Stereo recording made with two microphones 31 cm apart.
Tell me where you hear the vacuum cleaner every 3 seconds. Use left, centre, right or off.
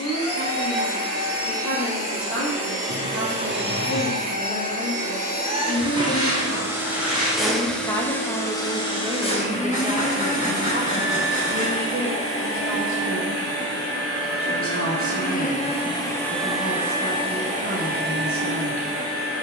right, right, centre, left, left, centre, right.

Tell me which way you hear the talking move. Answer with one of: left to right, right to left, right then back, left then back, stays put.
left to right.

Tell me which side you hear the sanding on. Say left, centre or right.
right.